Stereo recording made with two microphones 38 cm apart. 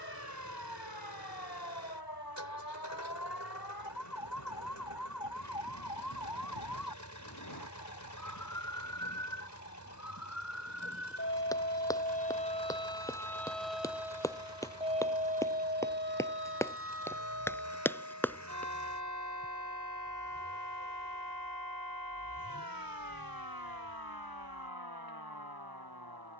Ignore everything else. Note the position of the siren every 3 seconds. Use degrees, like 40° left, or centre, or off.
80° left, 70° left, 60° left, 40° left, centre, 30° right, 50° right, 60° right, 70° right.